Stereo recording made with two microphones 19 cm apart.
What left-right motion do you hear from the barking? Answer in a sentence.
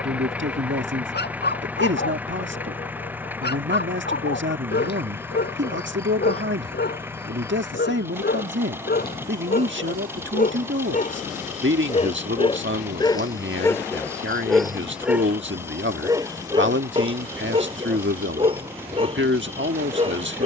In this clip you hear the barking move to the right.